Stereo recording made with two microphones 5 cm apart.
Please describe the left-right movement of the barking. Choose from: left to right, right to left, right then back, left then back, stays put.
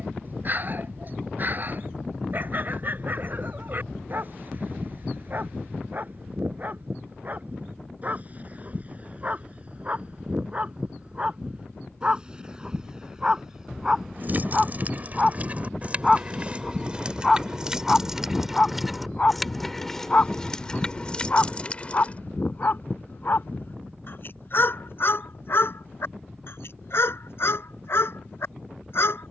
right to left.